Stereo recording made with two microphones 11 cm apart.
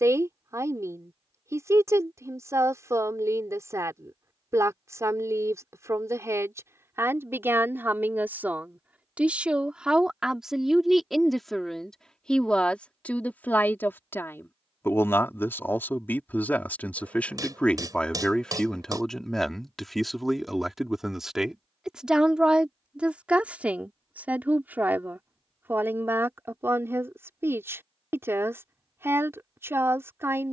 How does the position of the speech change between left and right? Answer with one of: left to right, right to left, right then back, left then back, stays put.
left then back.